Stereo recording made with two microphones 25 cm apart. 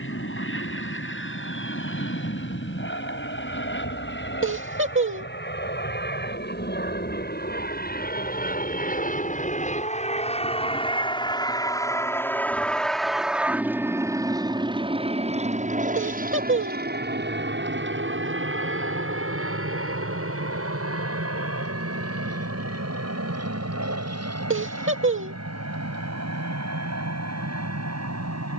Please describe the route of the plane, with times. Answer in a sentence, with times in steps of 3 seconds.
In this clip you hear the plane on the left from 0 s, in the centre from 12 s and on the right from 15 s.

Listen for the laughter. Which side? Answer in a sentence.
You can hear the laughter on the right.